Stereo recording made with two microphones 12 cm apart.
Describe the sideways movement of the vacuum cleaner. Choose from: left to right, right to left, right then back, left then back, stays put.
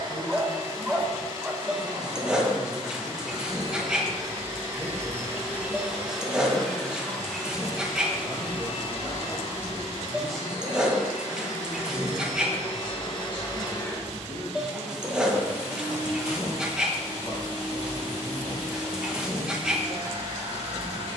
left then back.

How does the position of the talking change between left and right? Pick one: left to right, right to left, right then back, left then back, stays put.
right then back.